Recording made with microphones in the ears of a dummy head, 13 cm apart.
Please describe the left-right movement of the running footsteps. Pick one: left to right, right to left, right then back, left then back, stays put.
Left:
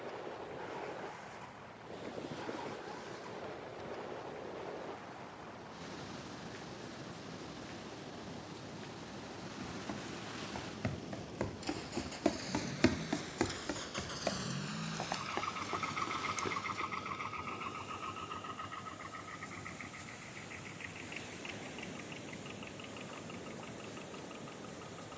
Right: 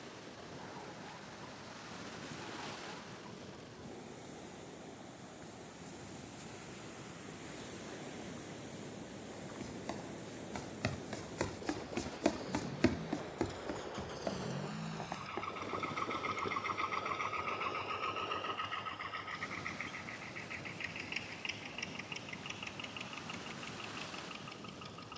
right to left.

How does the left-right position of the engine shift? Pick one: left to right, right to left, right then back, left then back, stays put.
left to right.